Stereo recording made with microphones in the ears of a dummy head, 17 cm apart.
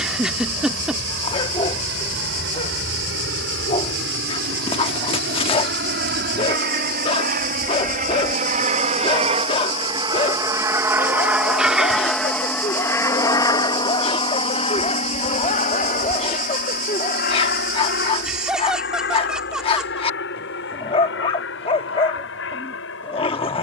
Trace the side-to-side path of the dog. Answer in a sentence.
You can hear the dog stay put.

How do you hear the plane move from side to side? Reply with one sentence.
In this clip you hear the plane go from the right side to the left.